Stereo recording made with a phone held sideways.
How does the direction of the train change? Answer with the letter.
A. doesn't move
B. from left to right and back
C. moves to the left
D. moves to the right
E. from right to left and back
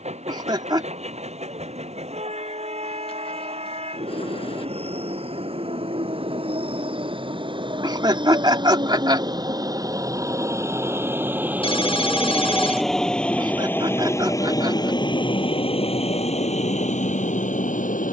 C.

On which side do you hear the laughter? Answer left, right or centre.
right.